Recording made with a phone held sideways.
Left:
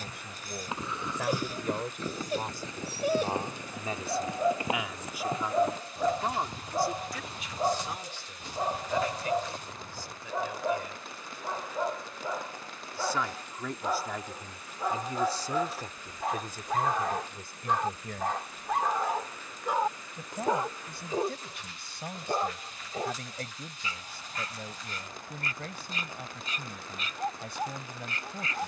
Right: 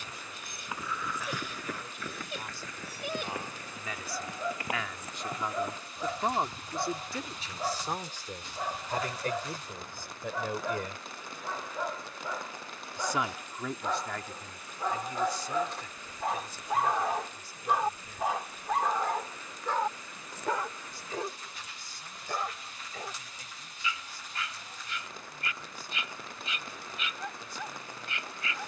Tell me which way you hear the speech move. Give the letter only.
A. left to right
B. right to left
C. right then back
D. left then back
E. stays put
C.